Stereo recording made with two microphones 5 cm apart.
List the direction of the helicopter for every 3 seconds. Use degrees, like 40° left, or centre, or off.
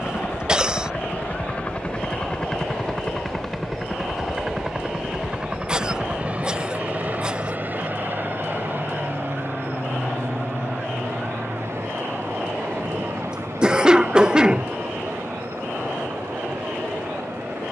30° left, 10° right, 30° right, 50° right, 60° right, 60° right.